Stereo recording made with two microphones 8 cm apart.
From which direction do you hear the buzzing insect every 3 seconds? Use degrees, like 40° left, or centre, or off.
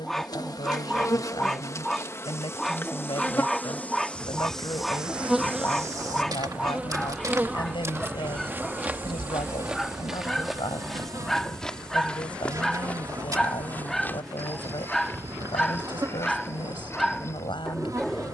40° left, centre, 20° right, 40° right, 40° right, 40° right.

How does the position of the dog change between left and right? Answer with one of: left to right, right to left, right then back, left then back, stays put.
stays put.